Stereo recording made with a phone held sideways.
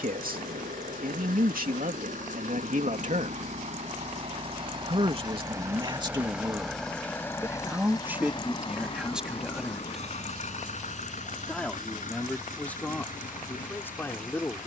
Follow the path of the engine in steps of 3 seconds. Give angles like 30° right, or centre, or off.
70° right, 40° right, 20° left, 50° left, 60° left.